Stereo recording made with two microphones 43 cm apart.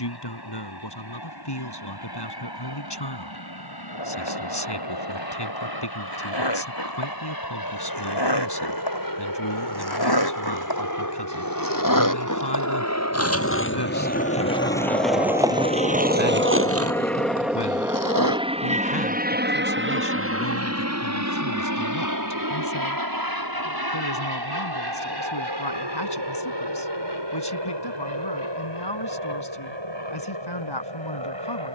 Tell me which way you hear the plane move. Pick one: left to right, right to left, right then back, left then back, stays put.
left to right.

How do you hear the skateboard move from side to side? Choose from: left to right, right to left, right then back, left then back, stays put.
left to right.